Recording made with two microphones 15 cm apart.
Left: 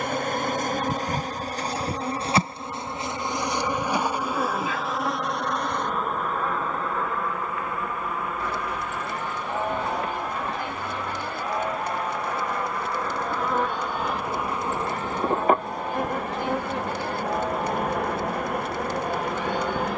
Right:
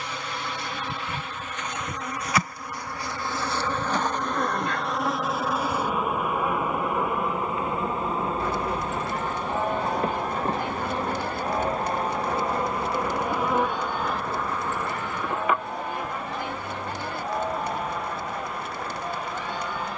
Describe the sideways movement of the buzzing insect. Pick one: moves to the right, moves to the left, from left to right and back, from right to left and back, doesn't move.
from left to right and back.